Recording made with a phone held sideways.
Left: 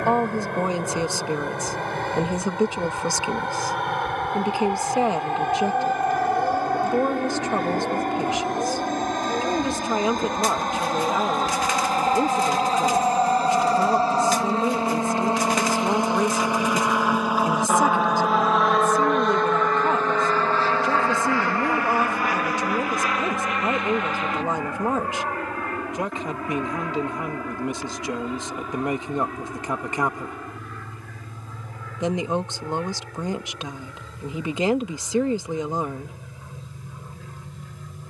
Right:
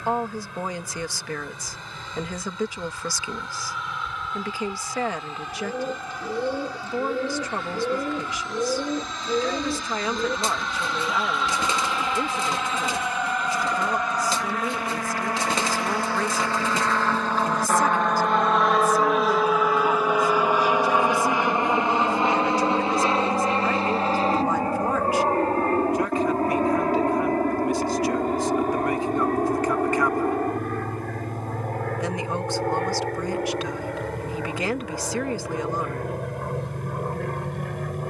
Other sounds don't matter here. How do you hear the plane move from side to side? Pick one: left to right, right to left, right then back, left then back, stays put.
left to right.